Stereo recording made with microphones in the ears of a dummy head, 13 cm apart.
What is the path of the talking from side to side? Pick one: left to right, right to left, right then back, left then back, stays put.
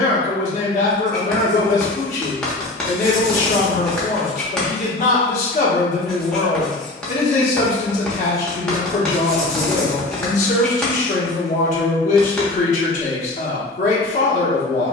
stays put.